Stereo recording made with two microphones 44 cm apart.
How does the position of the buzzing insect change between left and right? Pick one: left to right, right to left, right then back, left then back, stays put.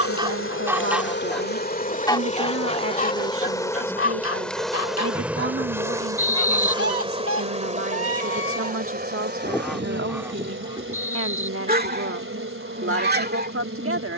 left to right.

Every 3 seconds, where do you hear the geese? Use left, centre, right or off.
centre, left, left, centre, right.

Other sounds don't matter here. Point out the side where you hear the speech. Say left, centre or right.
right.